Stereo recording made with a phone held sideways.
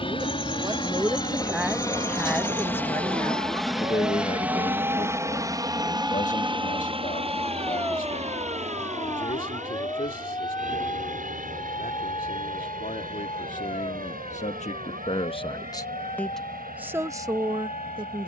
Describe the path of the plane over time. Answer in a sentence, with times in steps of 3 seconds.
You can hear the plane on the left from 0 s, in the centre from 3 s and on the right from 6 s.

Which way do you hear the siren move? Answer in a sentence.
You can hear the siren move from right to left.